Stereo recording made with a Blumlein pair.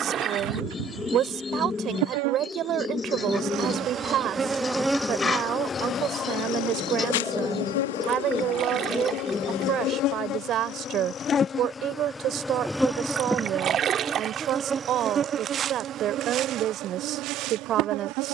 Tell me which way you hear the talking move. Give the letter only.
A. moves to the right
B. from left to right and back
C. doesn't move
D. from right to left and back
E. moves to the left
C.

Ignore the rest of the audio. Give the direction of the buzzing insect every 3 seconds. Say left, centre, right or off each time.
right, centre, left, left, centre, right.